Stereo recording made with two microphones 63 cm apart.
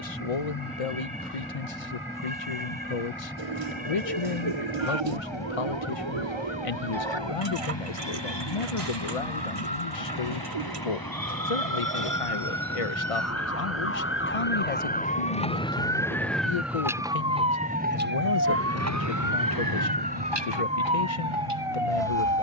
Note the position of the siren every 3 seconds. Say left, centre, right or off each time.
left, left, left, left, left, centre, right, right.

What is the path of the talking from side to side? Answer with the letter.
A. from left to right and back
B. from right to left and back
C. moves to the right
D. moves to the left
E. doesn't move
E.